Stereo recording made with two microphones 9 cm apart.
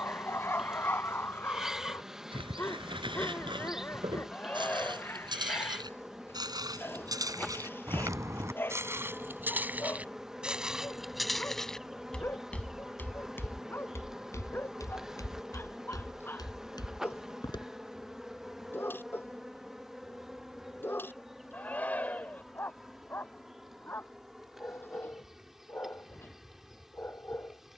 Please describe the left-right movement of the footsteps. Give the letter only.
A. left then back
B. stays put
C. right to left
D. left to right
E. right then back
C.